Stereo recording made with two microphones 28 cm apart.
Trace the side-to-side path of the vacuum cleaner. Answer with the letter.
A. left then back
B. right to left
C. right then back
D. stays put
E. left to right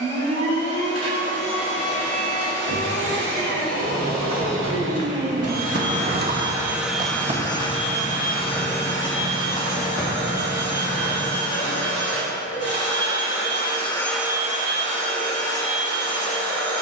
A.